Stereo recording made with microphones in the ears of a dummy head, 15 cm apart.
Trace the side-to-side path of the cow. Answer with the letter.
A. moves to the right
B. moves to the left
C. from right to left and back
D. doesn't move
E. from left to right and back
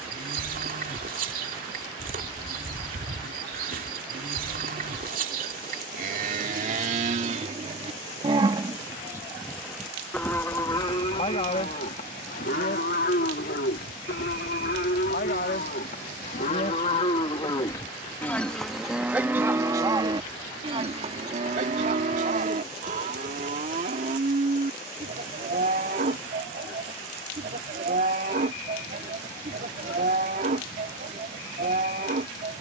C.